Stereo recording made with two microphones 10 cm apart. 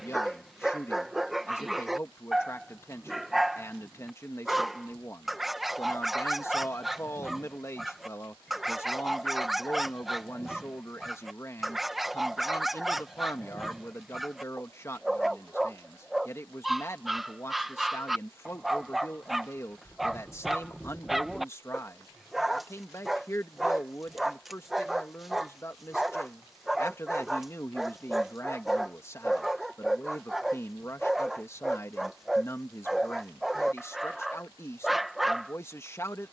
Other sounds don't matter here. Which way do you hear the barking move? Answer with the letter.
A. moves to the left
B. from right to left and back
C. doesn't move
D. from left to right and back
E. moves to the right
C.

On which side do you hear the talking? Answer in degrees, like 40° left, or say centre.
30° left.